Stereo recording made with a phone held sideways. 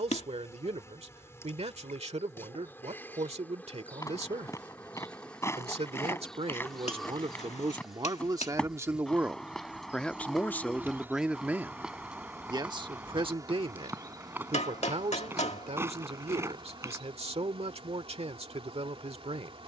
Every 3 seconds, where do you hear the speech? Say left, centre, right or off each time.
right, right, right, centre, right, right, right.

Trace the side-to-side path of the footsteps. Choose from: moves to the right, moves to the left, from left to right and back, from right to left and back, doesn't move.
moves to the right.